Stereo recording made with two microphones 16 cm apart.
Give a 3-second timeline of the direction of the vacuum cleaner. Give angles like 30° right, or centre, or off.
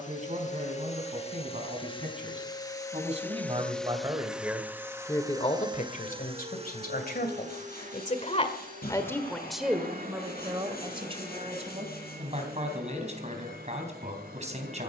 30° left, 10° right, 50° right, 60° right, 70° right.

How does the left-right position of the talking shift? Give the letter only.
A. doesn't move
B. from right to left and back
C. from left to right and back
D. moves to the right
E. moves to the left
B.